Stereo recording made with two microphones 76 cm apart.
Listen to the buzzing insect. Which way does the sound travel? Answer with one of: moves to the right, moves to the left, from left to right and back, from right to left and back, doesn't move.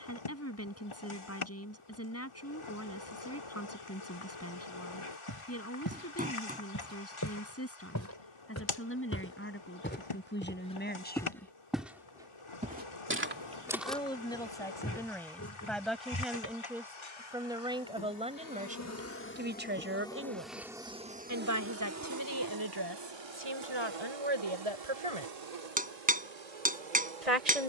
moves to the right.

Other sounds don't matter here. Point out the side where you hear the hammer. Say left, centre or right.
centre.